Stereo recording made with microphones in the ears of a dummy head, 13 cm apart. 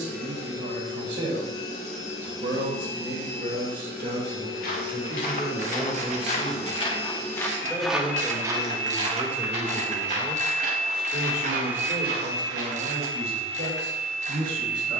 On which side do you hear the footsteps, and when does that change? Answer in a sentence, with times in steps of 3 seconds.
In this clip you hear the footsteps not at all from 0 s, on the left from 3 s, in the centre from 6 s and on the right from 9 s.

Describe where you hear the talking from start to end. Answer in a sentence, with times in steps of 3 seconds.
In this clip you hear the talking on the right from 0 s, in the centre from 6 s and on the right from 9 s.